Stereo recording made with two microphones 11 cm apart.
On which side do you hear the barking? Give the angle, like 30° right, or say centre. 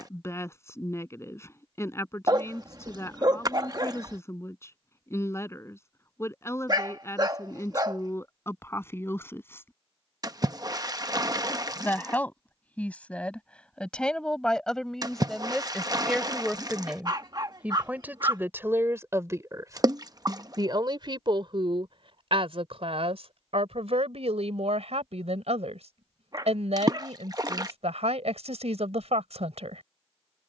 40° right.